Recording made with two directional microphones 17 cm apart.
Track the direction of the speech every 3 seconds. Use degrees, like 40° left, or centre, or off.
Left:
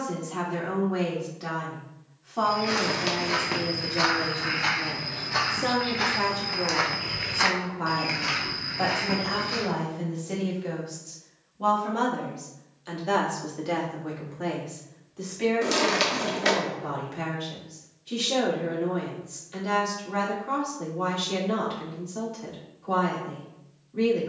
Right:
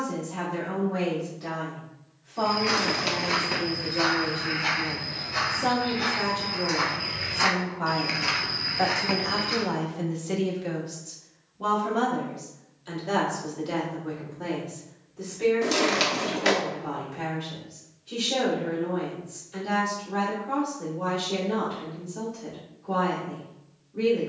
40° left, 30° left, 10° left, 10° right, 20° left, 40° left, 40° left, 40° left.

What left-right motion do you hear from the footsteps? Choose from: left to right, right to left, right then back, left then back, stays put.
left then back.